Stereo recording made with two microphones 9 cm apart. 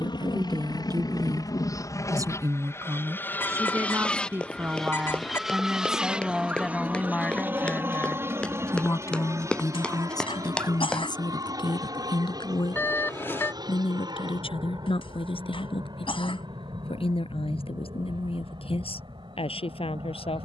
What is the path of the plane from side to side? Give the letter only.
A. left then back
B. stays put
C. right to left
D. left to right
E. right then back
D.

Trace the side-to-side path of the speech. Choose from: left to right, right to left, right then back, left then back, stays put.
right to left.